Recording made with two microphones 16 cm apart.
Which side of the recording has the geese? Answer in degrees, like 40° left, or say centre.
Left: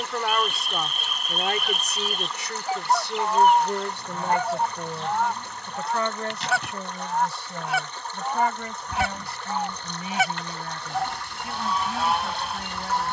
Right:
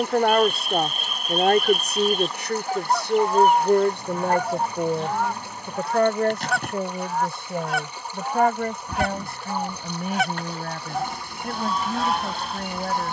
centre.